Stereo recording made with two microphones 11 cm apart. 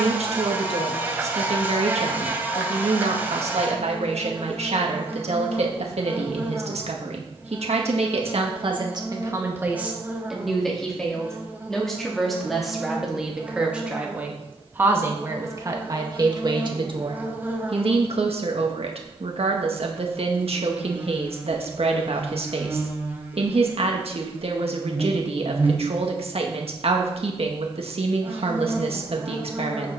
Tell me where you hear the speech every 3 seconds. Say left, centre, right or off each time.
right, right, right, centre, centre, right, right, right, right, right.